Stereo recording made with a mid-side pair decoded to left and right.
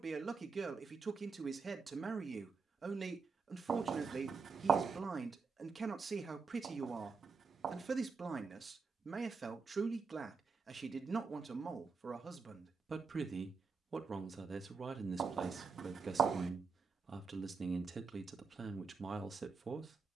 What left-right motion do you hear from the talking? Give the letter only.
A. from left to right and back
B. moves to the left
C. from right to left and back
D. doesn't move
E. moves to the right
D.